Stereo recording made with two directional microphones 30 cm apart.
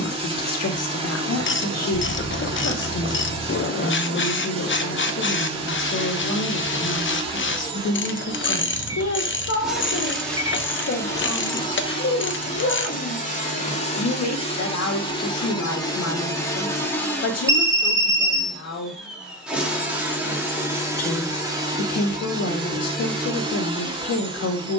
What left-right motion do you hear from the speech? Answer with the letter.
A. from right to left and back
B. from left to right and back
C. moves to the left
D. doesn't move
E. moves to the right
D.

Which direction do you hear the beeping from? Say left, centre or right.
centre.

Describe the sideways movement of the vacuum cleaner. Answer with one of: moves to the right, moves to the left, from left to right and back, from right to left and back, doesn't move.
from right to left and back.